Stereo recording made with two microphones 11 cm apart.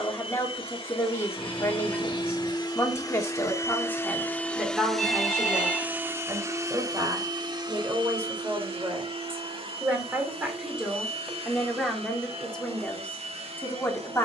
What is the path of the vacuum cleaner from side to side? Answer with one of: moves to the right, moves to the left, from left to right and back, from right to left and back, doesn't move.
moves to the right.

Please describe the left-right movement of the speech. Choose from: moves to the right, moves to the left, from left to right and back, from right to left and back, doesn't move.
from left to right and back.